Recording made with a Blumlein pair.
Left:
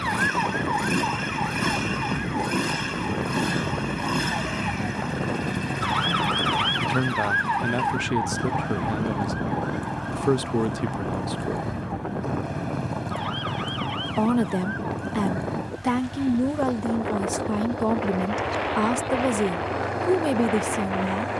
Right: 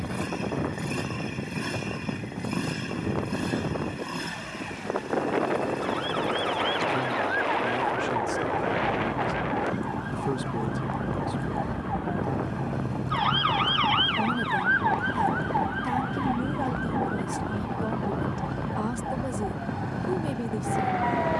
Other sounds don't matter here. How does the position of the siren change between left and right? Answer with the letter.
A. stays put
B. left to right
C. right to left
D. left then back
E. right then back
B.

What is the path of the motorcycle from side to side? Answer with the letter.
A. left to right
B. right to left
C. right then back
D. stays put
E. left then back
D.